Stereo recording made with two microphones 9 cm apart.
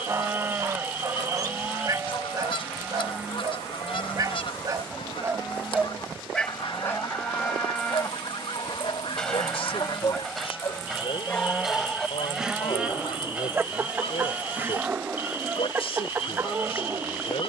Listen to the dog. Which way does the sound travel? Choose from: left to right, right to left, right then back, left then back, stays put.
left then back.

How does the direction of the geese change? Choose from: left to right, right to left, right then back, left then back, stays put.
stays put.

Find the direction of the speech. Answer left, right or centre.
left.